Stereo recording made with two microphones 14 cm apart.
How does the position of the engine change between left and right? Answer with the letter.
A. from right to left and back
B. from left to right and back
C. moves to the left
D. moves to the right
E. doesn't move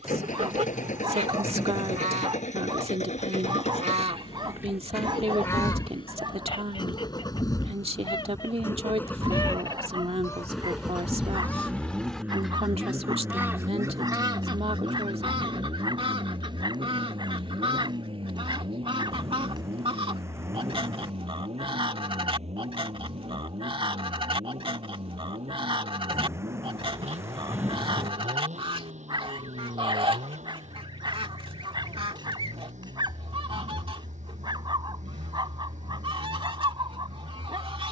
D.